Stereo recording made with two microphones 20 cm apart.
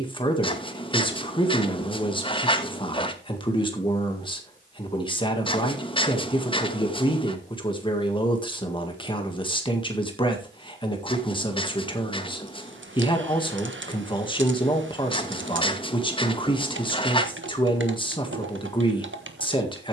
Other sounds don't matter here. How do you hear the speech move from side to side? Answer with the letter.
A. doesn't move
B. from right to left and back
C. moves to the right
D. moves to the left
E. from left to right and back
A.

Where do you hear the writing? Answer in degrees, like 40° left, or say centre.
30° left.